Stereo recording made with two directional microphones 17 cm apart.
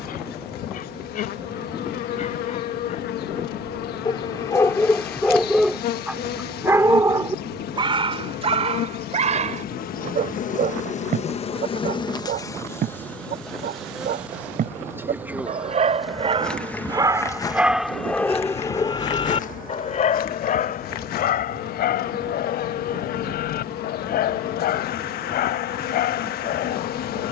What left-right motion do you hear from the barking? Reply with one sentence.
You can hear the barking move from left to right and back again.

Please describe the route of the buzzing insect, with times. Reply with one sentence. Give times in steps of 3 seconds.
In this clip you hear the buzzing insect on the left from 0 s, in the centre from 12 s and on the left from 18 s.